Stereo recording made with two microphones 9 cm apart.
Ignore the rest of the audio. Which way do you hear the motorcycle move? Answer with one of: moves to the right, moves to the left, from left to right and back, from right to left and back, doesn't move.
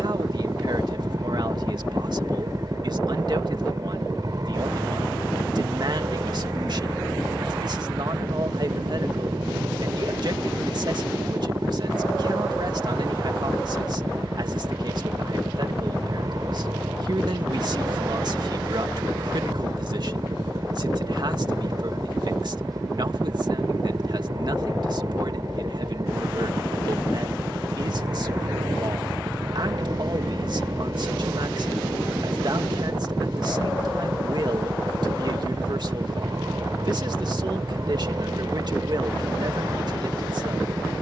doesn't move.